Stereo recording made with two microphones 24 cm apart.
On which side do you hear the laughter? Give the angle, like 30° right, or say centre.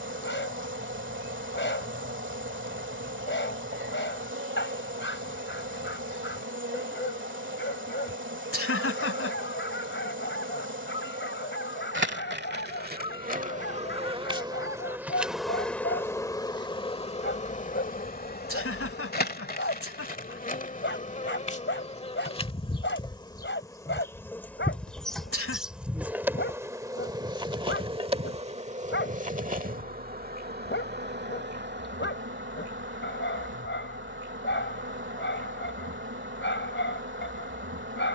70° left.